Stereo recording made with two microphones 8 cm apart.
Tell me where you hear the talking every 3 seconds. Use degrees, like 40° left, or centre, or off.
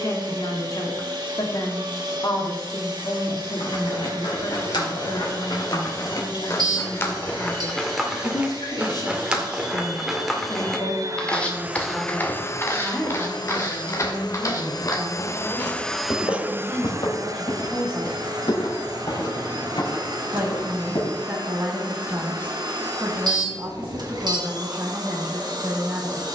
60° left, 60° left, 60° left, 40° left, centre, 20° right, 30° right, 30° right, 30° right.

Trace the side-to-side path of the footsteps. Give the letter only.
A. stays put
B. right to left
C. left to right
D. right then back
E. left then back
D.